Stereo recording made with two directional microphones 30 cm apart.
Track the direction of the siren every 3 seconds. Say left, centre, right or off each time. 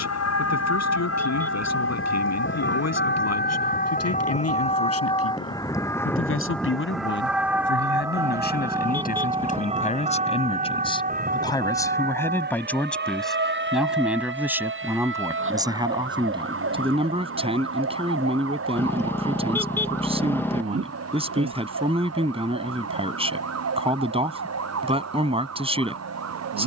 left, left, centre, right, right, right, right, right, right.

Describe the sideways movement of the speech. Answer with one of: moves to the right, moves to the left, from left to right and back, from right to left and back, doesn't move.
moves to the right.